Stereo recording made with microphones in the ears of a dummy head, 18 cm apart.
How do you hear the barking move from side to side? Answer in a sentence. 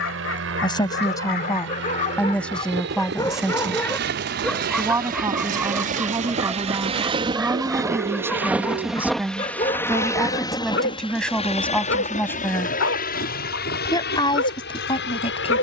You can hear the barking move from left to right and back again.